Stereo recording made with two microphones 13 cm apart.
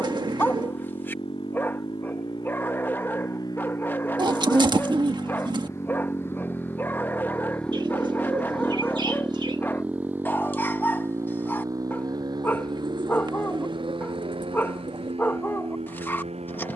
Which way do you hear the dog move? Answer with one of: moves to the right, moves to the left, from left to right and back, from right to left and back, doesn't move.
doesn't move.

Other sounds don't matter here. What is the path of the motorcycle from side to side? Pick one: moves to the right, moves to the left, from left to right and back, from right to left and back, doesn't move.
moves to the right.